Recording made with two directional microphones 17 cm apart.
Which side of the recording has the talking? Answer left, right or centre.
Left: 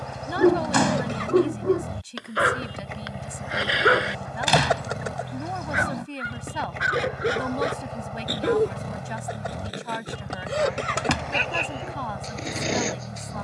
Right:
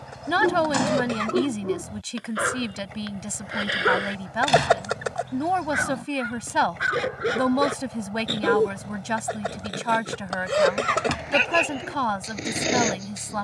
right.